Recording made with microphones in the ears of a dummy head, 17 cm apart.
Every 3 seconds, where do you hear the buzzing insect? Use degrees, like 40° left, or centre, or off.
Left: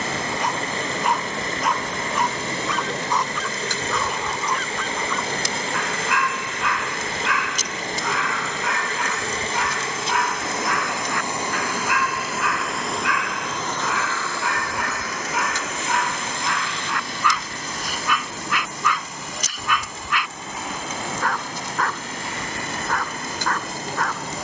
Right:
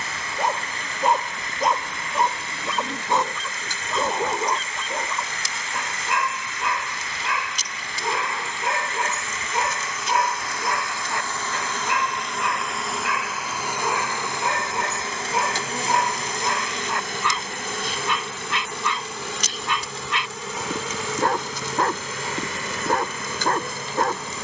60° left, 50° left, 40° left, 20° left, 10° right, 40° right, 50° right, 60° right.